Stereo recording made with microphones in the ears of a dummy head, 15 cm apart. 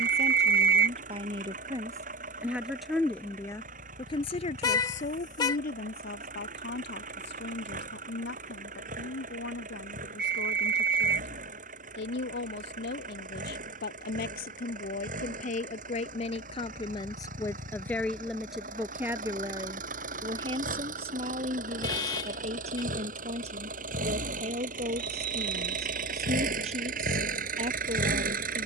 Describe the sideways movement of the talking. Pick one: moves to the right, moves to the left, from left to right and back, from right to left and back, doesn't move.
from right to left and back.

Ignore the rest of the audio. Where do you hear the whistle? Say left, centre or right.
right.